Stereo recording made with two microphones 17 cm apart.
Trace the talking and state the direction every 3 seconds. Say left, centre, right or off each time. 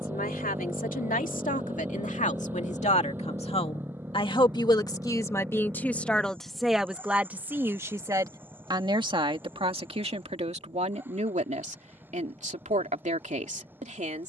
left, left, centre, right, right.